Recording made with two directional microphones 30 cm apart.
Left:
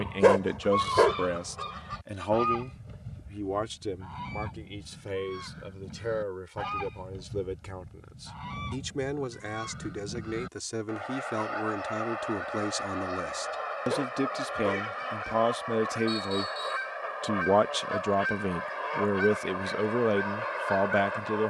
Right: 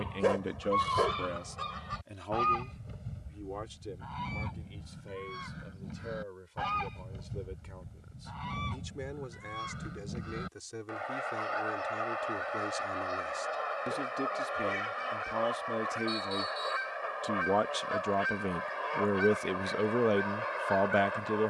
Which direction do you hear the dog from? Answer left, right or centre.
left.